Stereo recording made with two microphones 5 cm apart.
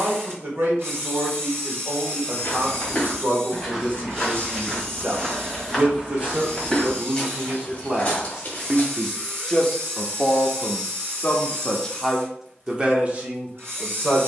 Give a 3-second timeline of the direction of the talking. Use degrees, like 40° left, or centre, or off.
50° right, 50° right, 30° right, 20° left, 30° right.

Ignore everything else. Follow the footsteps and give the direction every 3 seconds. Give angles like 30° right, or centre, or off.
30° left, centre, 20° left, off, off.